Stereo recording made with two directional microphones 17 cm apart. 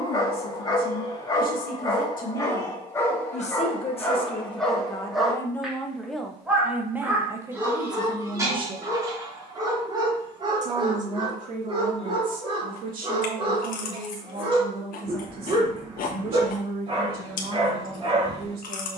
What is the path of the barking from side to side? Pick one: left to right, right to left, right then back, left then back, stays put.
left to right.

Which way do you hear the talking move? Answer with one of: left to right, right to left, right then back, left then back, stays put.
left to right.